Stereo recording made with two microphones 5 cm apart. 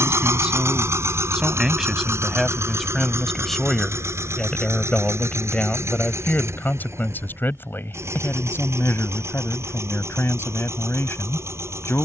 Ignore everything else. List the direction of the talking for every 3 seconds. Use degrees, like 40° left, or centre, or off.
10° right, 20° left, 50° left, 60° left.